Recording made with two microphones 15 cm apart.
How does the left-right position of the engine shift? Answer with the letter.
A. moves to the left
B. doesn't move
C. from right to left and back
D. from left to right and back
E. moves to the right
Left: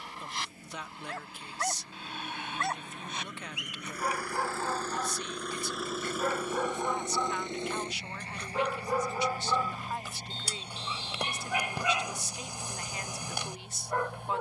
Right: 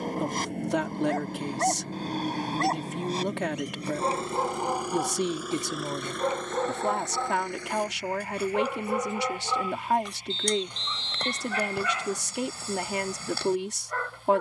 A.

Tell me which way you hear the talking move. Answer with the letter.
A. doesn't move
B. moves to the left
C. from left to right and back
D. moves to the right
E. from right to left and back
A.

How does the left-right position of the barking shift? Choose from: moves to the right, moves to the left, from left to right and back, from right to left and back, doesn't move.
moves to the left.